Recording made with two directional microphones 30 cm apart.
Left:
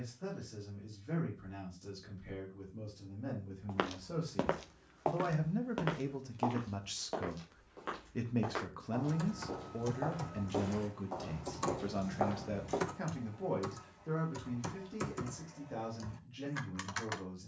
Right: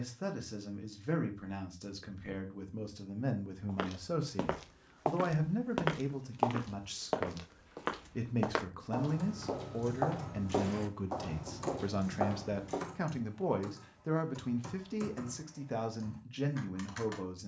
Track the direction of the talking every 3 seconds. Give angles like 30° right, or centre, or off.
70° right, 40° right, centre, 20° right, 40° right, 60° right.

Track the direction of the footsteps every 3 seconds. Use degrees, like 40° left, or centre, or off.
off, 10° right, 60° right, 40° right, centre, off.